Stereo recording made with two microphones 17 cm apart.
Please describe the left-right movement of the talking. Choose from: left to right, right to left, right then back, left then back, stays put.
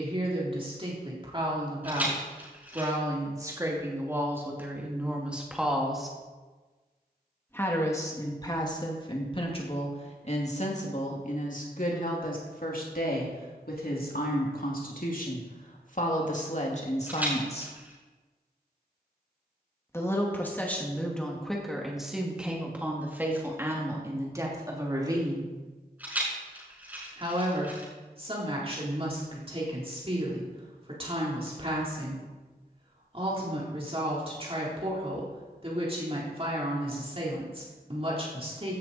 left then back.